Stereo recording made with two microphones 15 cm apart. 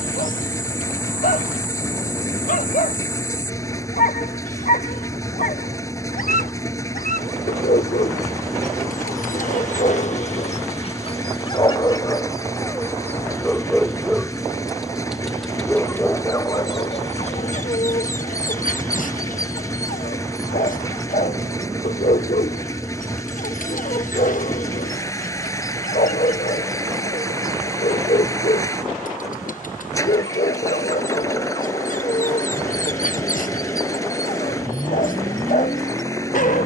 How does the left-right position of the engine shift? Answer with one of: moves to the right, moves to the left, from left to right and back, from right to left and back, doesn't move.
doesn't move.